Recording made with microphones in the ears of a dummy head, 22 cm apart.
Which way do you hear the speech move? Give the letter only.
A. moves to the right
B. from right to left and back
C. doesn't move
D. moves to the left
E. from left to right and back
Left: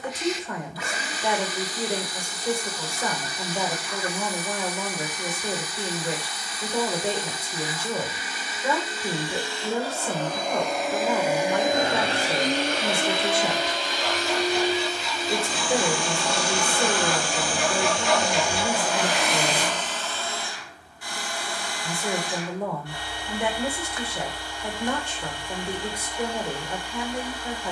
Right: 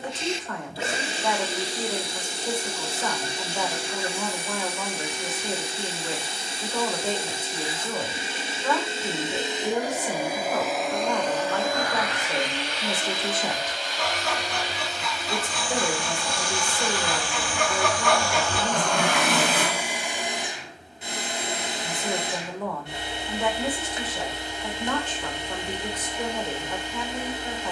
C.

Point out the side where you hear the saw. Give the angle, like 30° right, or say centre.
50° right.